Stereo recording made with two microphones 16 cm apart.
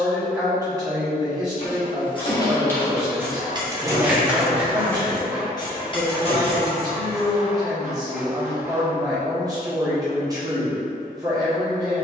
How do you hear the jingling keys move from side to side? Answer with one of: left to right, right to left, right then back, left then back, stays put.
right then back.